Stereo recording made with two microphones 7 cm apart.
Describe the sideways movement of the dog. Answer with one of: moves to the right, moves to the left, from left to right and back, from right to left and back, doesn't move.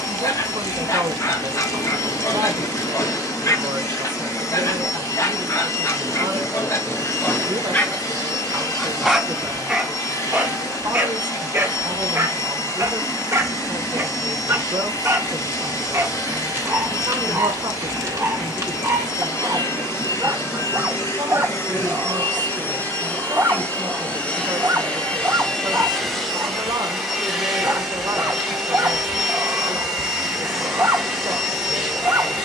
moves to the right.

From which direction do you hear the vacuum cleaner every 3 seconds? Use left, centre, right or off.
left, left, left, left, left, left, left, left, centre, centre, centre.